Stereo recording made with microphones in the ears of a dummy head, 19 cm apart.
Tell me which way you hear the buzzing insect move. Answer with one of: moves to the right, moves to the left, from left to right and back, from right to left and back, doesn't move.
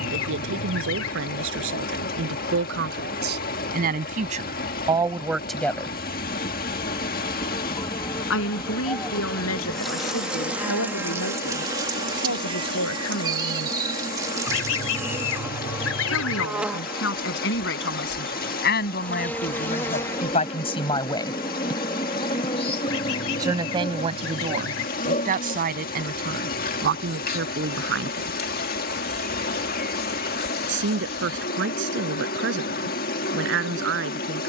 from left to right and back.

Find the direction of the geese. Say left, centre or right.
left.